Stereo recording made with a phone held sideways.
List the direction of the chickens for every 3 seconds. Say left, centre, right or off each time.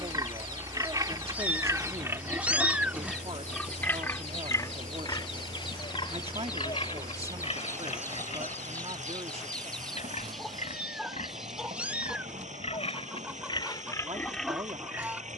left, left, left, centre, centre.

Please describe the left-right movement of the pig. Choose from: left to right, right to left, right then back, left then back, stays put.
left then back.